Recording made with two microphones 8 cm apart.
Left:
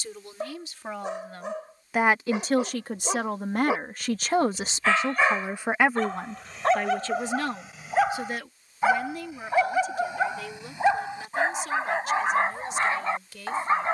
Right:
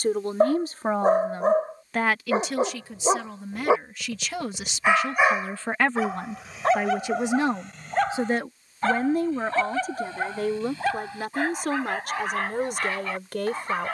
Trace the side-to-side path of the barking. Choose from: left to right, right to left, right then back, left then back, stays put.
right to left.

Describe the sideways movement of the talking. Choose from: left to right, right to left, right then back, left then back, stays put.
left then back.